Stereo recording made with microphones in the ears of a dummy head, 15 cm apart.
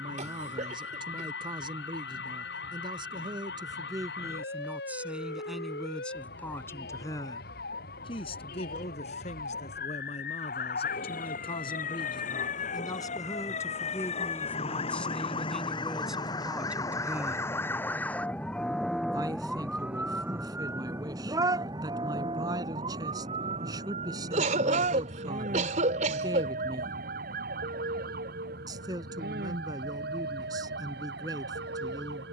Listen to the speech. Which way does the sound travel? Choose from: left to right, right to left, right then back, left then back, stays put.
left then back.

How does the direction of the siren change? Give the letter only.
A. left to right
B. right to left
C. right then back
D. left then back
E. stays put
A.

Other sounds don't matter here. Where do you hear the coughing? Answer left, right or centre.
right.